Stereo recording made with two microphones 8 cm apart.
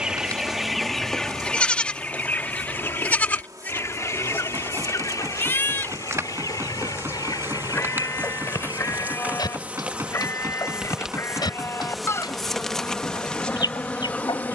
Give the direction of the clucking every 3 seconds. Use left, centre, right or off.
centre, left, left, left, left.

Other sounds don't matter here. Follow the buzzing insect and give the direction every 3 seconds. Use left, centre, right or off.
right, right, right, centre, centre.